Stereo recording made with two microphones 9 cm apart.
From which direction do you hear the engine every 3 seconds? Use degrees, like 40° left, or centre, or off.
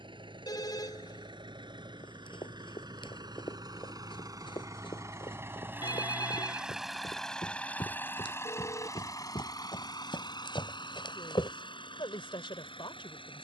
60° right, 40° right, 10° left, 50° left, 70° left.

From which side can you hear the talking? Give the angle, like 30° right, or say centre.
70° left.